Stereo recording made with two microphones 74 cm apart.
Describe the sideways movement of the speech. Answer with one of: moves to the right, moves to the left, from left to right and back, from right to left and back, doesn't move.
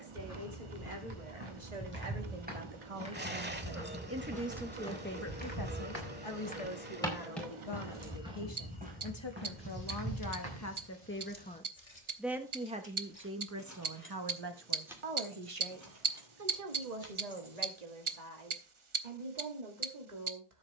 from right to left and back.